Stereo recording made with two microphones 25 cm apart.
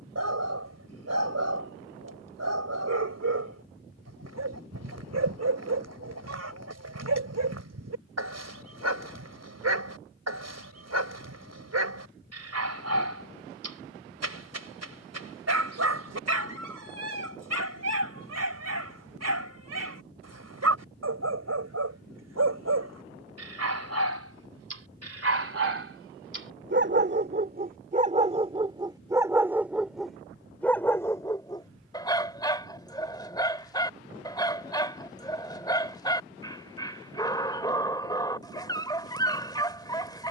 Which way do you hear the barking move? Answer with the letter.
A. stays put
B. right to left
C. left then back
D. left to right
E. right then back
B.